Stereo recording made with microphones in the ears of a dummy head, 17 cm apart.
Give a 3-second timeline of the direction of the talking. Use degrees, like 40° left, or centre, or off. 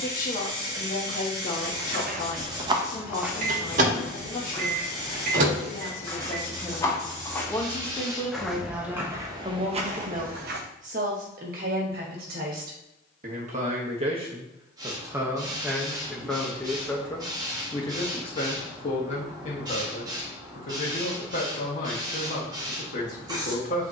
50° left, 40° left, 10° left, 40° right, 40° right, centre, 40° left, 40° left.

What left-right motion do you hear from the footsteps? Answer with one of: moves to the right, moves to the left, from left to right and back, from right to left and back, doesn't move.
from right to left and back.